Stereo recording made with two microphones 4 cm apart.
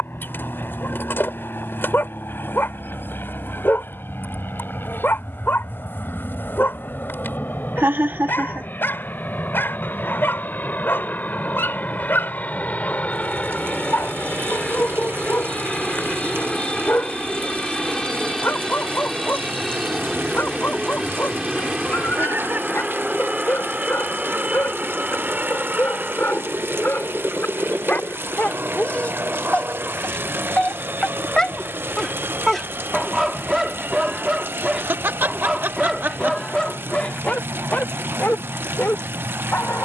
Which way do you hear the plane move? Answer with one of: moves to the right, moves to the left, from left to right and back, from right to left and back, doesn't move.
moves to the right.